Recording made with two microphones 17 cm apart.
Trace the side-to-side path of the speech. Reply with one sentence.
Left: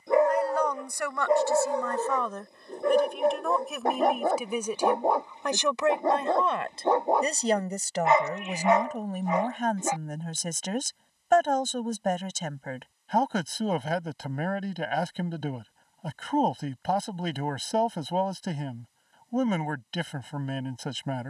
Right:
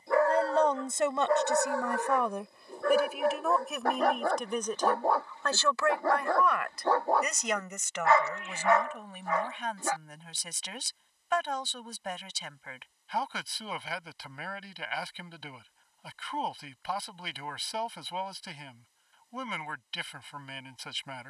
You can hear the speech move from right to left.